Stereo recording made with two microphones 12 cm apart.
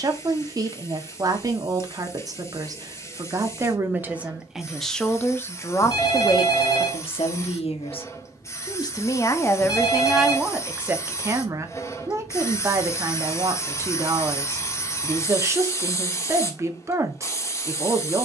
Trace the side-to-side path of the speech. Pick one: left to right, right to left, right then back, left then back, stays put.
left then back.